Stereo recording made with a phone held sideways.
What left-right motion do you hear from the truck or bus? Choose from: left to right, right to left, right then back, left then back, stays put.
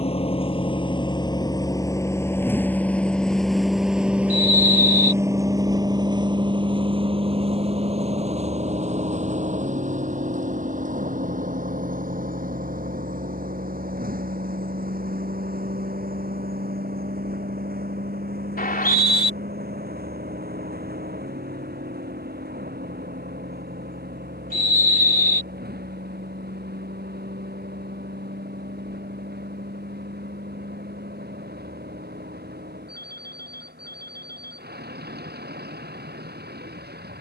left to right.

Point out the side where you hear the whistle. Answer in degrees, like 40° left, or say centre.
70° left.